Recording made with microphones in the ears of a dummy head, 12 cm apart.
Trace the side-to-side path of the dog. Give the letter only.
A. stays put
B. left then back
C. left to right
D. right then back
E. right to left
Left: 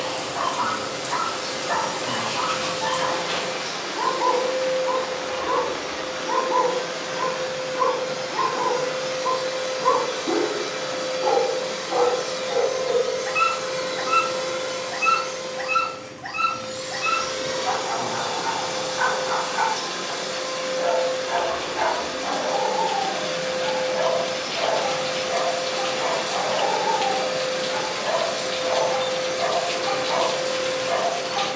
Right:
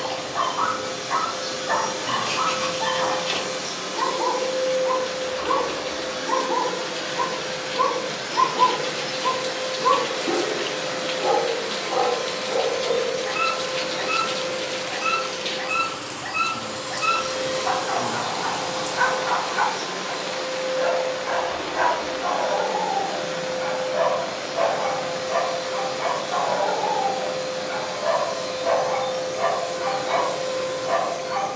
B.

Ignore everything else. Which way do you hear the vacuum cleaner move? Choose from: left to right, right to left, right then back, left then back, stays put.
right to left.